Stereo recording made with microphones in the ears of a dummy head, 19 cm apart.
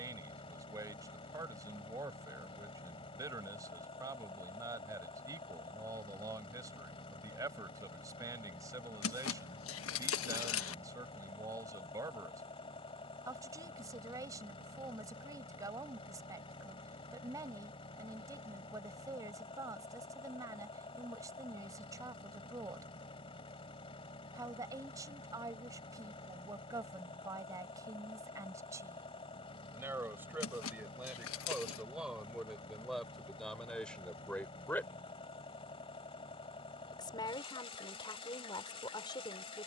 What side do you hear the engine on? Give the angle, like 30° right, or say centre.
30° left.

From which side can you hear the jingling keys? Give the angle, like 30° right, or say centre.
70° left.